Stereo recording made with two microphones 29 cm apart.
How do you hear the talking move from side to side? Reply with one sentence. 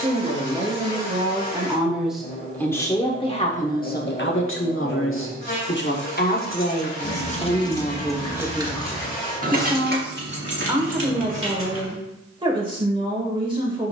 You can hear the talking go left and come back.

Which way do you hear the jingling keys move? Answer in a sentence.
You can hear the jingling keys go from the left side to the right.